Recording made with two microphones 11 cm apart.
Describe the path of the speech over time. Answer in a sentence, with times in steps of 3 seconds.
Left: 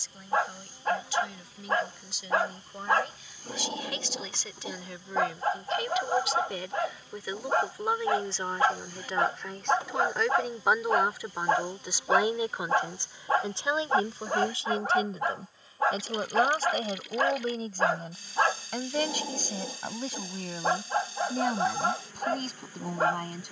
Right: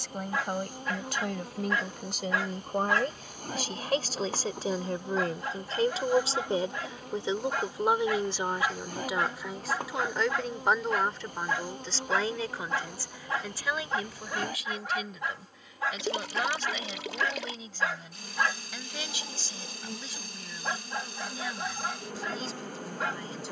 You can hear the speech on the right from 0 s, in the centre from 9 s and on the left from 12 s.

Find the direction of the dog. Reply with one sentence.
In this clip you hear the dog on the left.